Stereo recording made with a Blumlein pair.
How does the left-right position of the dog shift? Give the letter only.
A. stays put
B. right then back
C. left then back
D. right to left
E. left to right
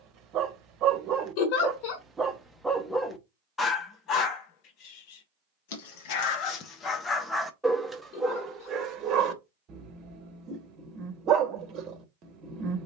C.